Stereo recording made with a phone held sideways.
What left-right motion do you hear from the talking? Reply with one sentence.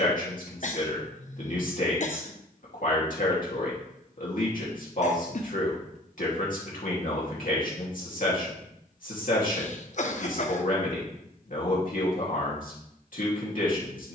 You can hear the talking stay in one place.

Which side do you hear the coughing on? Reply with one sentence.
You can hear the coughing on the left.